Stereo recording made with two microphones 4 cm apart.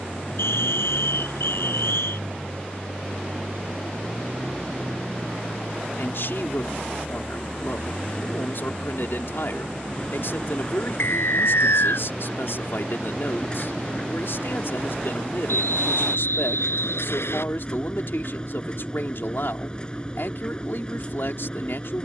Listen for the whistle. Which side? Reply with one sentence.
In this clip you hear the whistle on the left.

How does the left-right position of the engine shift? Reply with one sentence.
In this clip you hear the engine stay in one place.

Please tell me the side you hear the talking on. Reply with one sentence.
You can hear the talking on the left.